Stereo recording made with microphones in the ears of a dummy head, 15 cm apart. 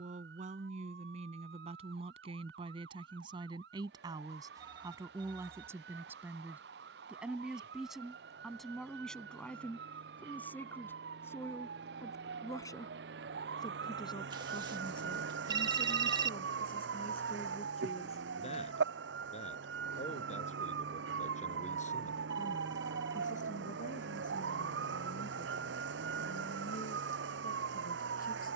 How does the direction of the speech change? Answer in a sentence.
In this clip you hear the speech move from right to left.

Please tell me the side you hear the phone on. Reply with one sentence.
In this clip you hear the phone on the right.